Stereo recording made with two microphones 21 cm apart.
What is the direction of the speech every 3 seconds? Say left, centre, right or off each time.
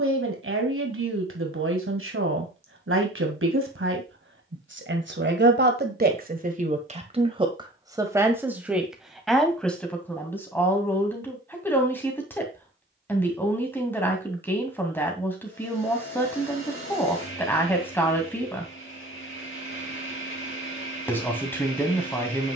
right, right, right, centre, centre, centre, centre, centre.